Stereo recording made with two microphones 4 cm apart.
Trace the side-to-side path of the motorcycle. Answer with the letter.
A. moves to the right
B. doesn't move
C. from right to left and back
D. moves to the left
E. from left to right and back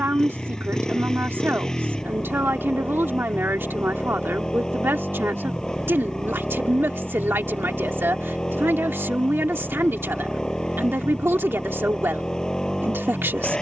B.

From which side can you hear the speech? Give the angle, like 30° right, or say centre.
70° right.